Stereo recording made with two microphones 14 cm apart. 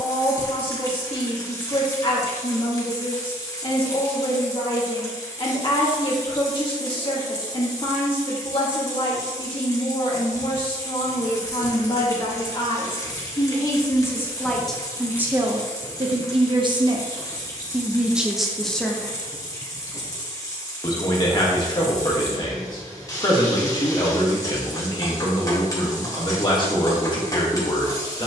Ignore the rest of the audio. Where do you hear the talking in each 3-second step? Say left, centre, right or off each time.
left, left, left, left, left, right, centre, left, left, left.